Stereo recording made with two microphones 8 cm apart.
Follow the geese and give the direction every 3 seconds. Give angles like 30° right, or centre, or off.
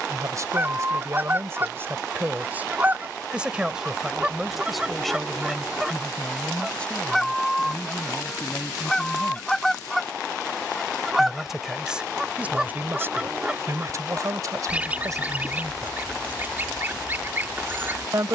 30° right, 10° right, centre, centre, 10° right, 30° right.